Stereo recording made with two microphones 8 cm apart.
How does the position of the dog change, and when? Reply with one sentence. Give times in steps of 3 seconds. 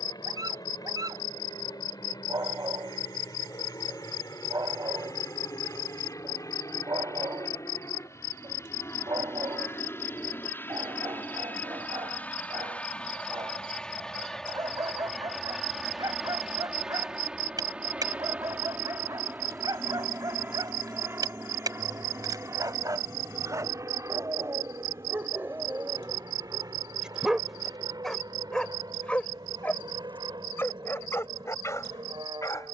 In this clip you hear the dog on the right from 0 s, in the centre from 27 s and on the left from 30 s.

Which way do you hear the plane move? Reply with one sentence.
In this clip you hear the plane travel towards the right.